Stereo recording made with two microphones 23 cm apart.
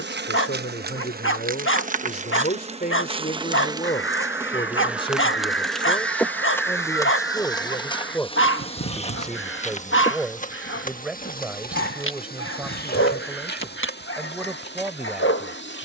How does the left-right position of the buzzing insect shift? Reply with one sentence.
In this clip you hear the buzzing insect travel towards the left.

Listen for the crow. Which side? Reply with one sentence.
In this clip you hear the crow on the left.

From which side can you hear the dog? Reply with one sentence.
In this clip you hear the dog on the left.